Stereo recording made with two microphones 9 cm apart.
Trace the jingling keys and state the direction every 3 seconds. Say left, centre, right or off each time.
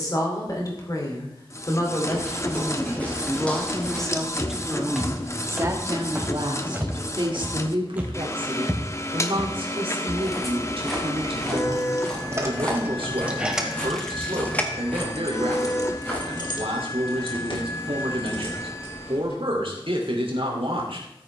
off, off, off, right, centre, left, left.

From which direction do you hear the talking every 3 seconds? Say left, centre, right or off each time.
left, centre, right, right, right, right, right.